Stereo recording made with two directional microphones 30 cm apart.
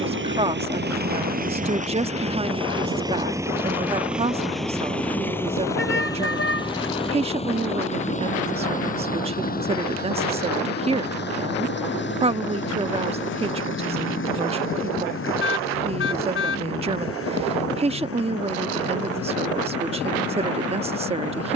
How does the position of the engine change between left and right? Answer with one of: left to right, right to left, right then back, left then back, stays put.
right to left.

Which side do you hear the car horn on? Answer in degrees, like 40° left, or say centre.
40° left.